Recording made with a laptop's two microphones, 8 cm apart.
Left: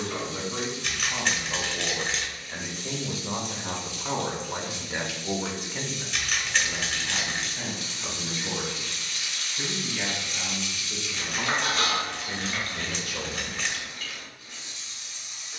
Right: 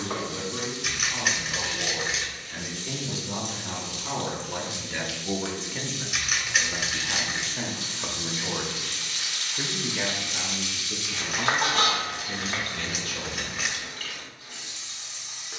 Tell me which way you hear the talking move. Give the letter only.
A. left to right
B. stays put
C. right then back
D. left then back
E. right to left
C.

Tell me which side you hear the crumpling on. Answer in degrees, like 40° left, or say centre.
10° right.